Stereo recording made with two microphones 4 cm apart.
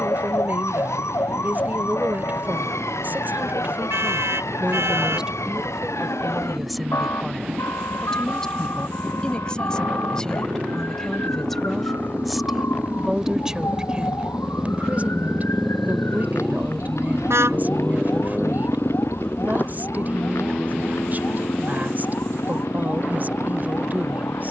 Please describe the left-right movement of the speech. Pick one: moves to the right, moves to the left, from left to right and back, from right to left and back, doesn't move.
from right to left and back.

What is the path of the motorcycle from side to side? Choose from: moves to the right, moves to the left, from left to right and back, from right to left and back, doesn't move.
moves to the left.